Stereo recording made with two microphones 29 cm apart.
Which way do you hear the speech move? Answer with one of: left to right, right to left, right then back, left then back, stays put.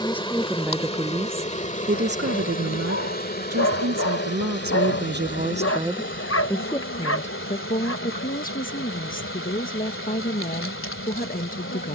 right then back.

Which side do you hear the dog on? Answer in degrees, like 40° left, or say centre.
50° left.